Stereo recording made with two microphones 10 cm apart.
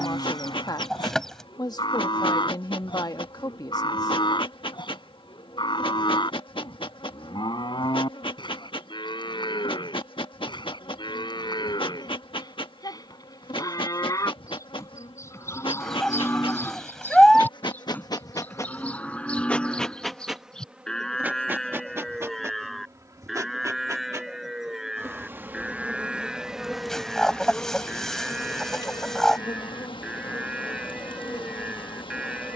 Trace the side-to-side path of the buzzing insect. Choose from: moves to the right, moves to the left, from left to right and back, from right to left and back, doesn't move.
from left to right and back.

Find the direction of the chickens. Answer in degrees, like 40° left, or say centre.
10° left.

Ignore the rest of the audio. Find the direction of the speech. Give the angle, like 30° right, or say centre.
50° left.